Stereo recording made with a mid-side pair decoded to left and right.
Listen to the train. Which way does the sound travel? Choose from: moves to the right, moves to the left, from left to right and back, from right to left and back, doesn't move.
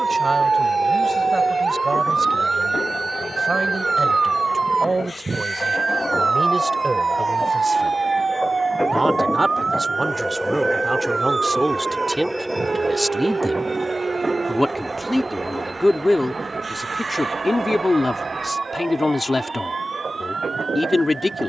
moves to the right.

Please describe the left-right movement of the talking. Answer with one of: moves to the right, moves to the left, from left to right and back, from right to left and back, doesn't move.
moves to the left.